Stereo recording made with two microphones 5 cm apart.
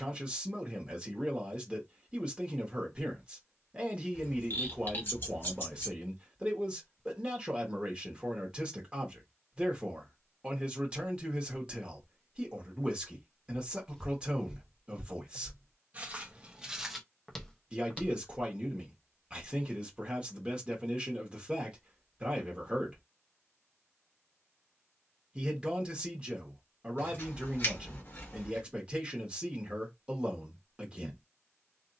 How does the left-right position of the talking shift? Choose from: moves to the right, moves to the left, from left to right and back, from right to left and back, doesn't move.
doesn't move.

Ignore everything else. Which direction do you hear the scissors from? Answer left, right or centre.
left.